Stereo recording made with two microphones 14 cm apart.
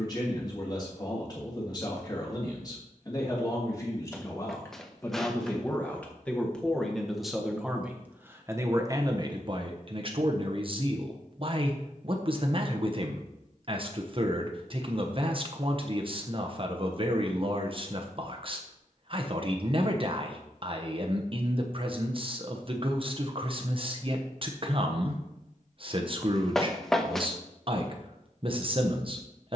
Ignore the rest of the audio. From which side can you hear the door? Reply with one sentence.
In this clip you hear the door in the centre.